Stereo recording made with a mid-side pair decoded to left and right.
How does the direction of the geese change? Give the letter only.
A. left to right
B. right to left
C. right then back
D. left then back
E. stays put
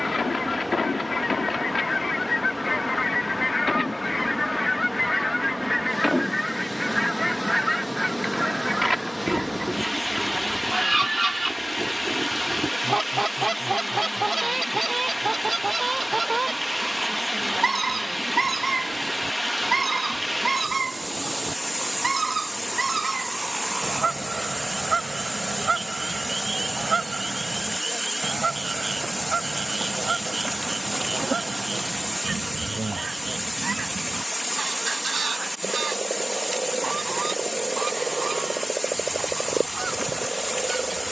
A.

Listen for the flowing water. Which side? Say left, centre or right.
centre.